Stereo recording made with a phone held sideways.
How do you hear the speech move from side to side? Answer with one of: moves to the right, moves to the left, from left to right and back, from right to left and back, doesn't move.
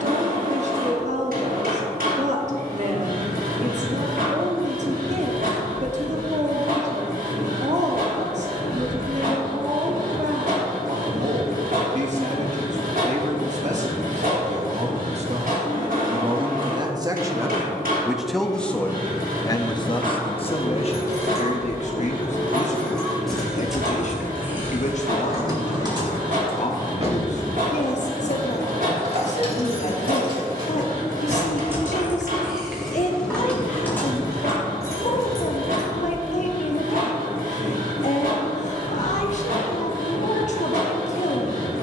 moves to the left.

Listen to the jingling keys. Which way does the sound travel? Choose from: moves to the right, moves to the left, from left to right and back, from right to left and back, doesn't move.
from left to right and back.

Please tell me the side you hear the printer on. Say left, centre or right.
right.